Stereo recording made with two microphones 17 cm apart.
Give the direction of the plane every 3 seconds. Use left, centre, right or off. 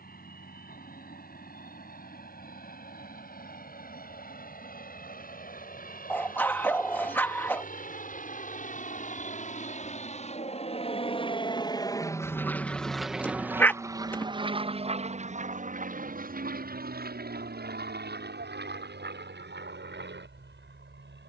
left, left, left, left, centre, right, right.